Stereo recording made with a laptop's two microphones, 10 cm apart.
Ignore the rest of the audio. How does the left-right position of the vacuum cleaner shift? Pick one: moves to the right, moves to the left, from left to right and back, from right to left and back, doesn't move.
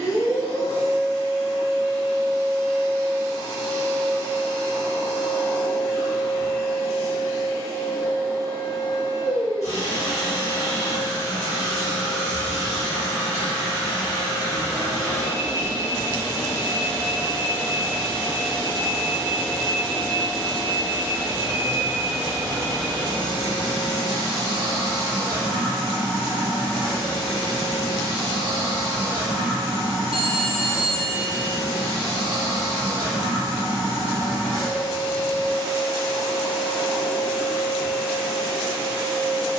moves to the right.